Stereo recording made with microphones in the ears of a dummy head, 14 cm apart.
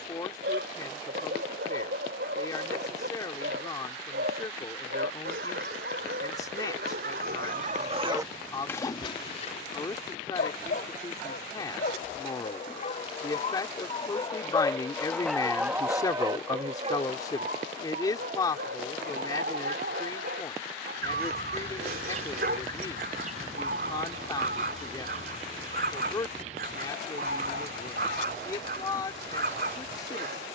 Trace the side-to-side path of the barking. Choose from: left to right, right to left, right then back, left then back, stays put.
left then back.